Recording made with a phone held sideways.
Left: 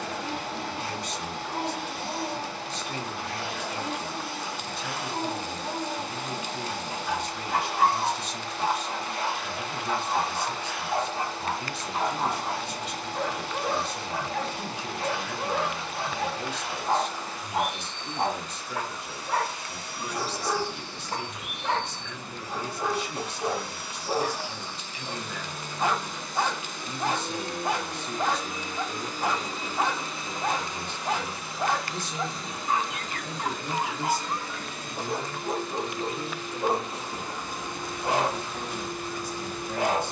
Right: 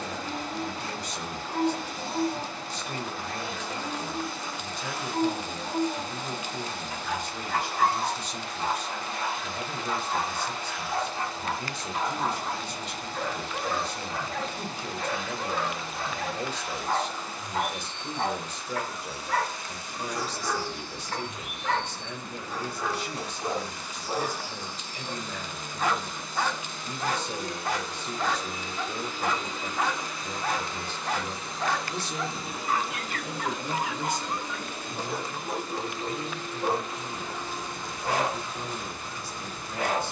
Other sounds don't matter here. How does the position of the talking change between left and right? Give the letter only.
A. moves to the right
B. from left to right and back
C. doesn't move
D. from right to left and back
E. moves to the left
E.